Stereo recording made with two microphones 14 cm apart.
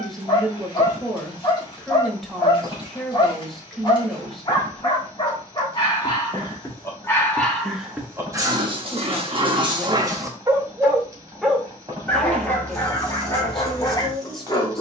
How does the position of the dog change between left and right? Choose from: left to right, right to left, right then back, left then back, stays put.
right then back.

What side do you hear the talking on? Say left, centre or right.
centre.